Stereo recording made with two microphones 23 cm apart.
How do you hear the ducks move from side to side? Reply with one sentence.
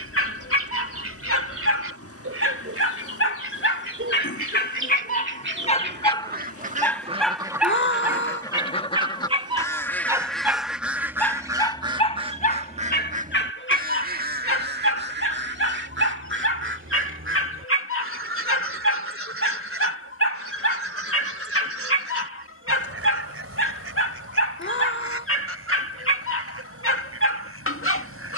You can hear the ducks move from right to left and back again.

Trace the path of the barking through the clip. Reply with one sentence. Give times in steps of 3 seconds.
In this clip you hear the barking on the left from 0 s, in the centre from 6 s and on the left from 12 s.